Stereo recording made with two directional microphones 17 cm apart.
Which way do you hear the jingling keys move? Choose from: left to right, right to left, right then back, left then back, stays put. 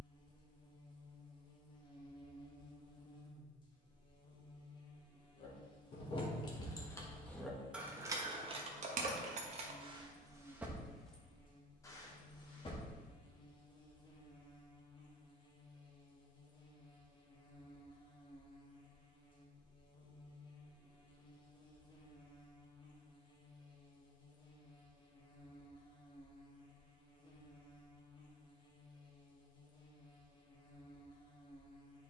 right then back.